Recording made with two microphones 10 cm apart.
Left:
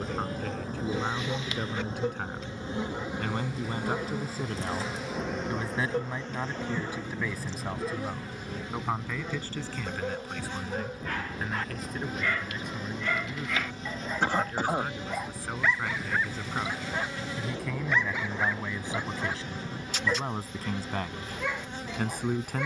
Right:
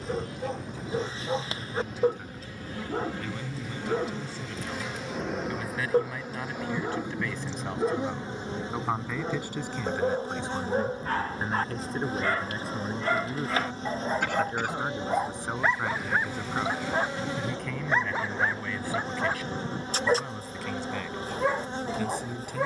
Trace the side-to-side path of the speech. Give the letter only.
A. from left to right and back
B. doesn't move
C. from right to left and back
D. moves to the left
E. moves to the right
A.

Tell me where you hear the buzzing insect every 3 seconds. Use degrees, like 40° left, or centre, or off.
30° left, 10° left, 20° right, 30° right, 30° right, 30° right, 30° right, 30° right.